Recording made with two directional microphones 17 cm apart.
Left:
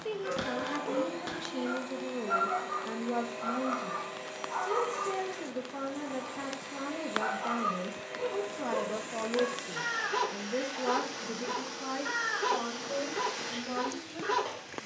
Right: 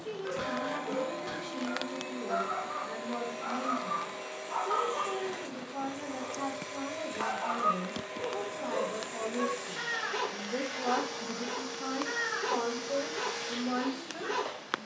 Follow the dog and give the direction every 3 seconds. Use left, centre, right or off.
left, centre, centre, left, left.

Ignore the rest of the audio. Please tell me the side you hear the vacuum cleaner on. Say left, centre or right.
centre.